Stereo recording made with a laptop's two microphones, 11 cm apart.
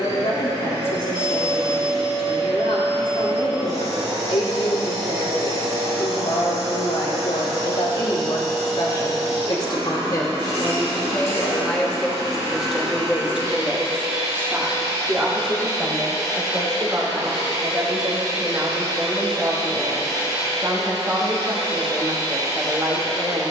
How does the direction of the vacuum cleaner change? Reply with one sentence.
In this clip you hear the vacuum cleaner stay put.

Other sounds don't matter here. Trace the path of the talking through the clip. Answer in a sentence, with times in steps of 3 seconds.
You can hear the talking on the left from 0 s, in the centre from 12 s and on the right from 15 s.